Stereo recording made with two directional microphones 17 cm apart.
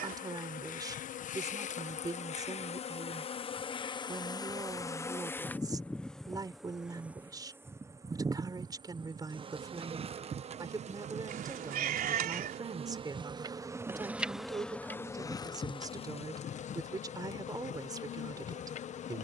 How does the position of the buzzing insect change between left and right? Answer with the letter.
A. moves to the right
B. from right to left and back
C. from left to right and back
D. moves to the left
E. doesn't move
C.